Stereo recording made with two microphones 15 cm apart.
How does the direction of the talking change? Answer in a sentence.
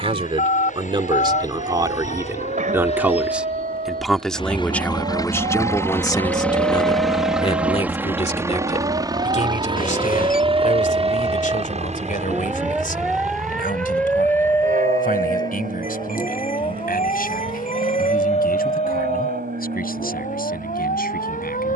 In this clip you hear the talking move from right to left.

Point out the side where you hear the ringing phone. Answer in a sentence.
In this clip you hear the ringing phone on the left.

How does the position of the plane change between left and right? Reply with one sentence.
You can hear the plane go from the left side to the right.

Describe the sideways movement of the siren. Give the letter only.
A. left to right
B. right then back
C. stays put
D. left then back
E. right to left
E.